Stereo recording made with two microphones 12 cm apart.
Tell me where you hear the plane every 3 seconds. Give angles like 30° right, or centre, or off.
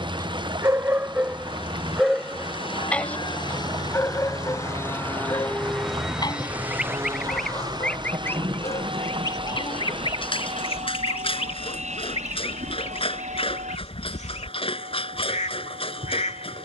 50° left, 30° left, 30° right, 60° right, 70° right, 70° right.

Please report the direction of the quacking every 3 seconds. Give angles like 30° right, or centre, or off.
40° right, 30° right, 10° left, 50° left, 70° left, 70° left.